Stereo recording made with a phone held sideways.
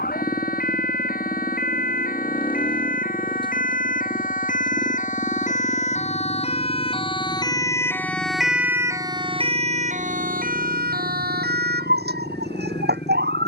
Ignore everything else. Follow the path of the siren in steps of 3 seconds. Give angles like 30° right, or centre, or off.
60° left, 60° left, 20° left, 50° right, 80° right.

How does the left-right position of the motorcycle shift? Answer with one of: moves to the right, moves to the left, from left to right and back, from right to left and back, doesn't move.
doesn't move.